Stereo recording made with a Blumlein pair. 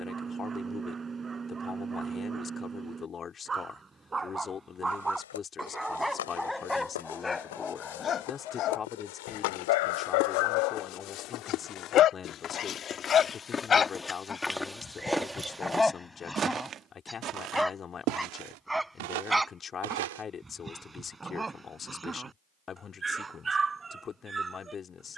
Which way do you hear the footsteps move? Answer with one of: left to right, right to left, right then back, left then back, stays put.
left to right.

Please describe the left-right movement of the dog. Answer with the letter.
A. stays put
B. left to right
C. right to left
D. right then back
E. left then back
E.